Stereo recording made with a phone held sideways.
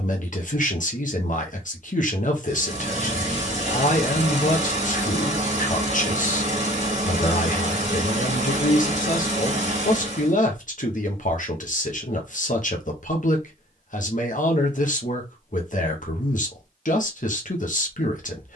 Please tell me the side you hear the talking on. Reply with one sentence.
In this clip you hear the talking on the left.